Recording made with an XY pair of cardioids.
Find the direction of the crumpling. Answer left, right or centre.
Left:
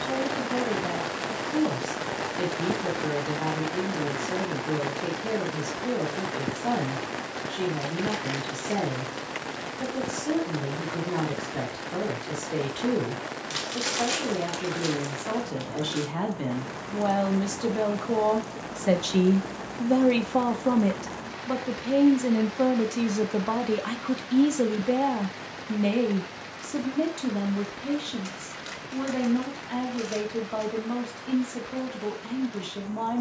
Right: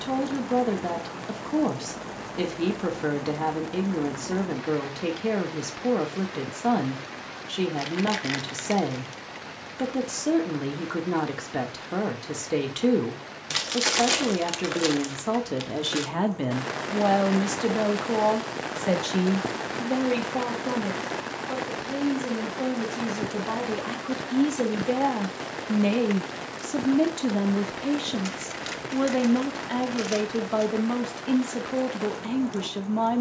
right.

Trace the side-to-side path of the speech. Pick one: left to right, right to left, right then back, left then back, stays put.
left then back.